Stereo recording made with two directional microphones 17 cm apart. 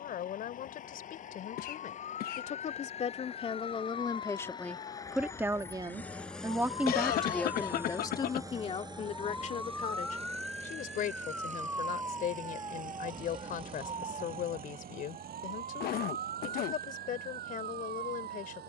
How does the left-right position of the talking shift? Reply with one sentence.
In this clip you hear the talking go right and come back.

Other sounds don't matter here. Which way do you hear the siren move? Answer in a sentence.
In this clip you hear the siren move from left to right.